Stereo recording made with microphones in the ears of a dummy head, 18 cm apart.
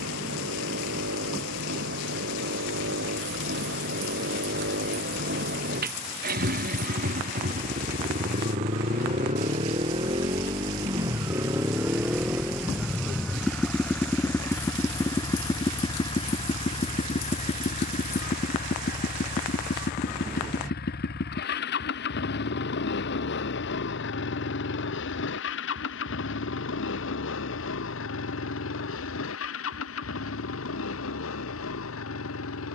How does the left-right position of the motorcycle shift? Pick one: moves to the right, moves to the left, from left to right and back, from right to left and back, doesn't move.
moves to the left.